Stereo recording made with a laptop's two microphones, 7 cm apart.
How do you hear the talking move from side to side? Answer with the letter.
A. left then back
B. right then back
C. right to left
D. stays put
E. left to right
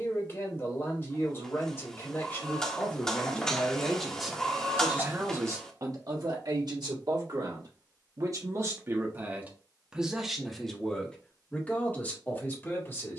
B.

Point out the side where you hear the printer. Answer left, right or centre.
centre.